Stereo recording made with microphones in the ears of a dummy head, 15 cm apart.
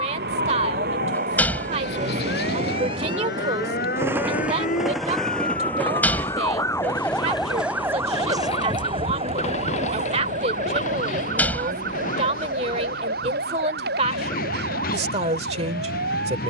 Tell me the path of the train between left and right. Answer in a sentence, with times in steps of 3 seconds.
In this clip you hear the train on the right from 0 s, in the centre from 3 s and on the left from 6 s.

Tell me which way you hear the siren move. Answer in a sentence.
In this clip you hear the siren travel towards the right.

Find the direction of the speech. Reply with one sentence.
You can hear the speech on the right.